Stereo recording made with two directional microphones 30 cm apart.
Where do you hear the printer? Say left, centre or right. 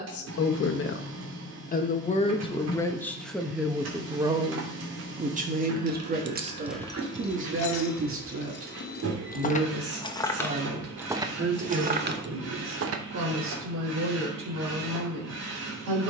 right.